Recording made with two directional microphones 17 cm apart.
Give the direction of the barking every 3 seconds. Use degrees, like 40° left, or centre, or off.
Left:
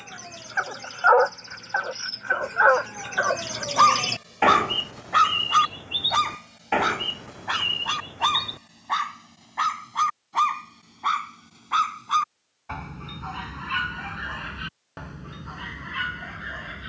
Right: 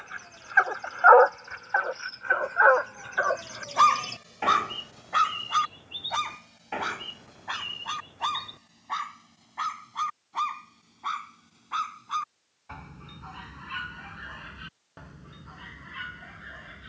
10° right, 20° left, 40° left, 40° left, 50° left, 50° left.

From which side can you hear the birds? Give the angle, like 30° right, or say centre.
60° left.